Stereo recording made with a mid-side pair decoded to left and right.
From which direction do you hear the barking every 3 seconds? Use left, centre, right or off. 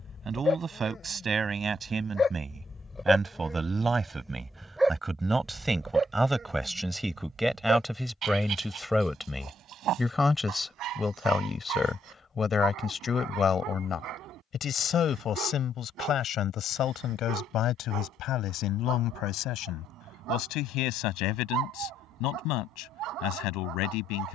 left, centre, right, right, right, right, right, right.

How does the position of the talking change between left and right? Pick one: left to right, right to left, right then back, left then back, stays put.
right to left.